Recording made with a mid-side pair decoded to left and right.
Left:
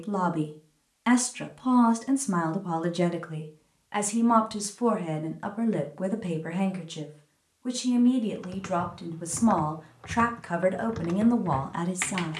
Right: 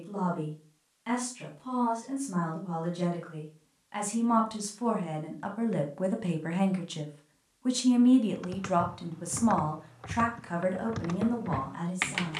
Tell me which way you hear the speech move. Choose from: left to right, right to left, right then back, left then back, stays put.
right then back.